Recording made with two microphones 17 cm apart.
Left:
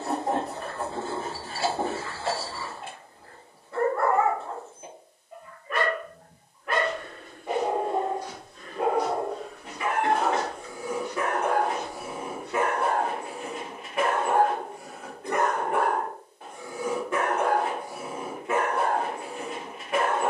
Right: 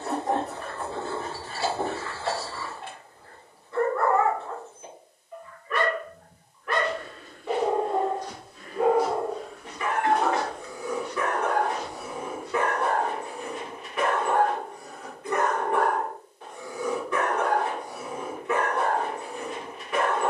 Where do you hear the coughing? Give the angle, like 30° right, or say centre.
60° left.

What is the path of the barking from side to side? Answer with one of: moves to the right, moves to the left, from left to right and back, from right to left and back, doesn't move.
doesn't move.